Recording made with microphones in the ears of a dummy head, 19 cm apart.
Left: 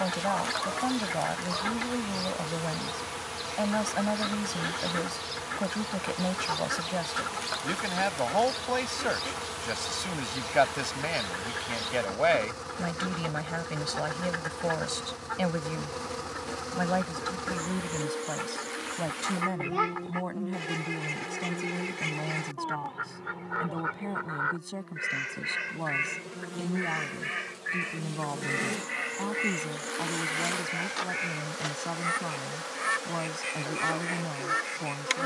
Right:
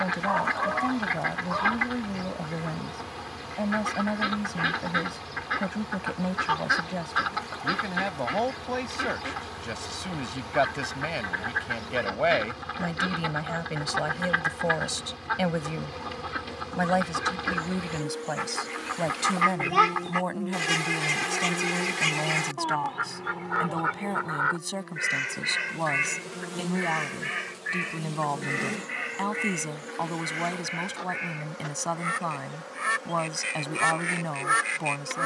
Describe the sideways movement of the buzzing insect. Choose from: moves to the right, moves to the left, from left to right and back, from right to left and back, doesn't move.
from left to right and back.